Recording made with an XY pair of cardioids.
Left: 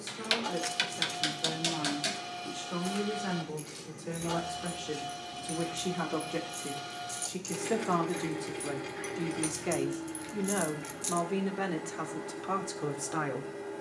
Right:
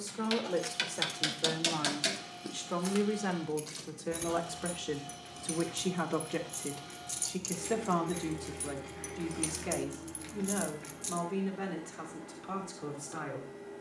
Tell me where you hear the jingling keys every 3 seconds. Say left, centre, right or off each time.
centre, right, right, centre, off.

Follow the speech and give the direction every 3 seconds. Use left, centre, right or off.
right, right, centre, left, left.